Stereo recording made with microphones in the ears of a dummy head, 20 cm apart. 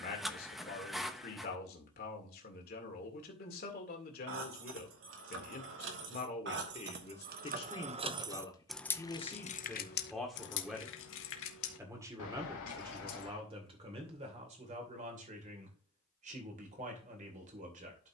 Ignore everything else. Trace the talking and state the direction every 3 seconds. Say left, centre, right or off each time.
left, left, left, centre, right, right.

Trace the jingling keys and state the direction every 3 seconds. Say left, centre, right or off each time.
off, right, right, left, left, off.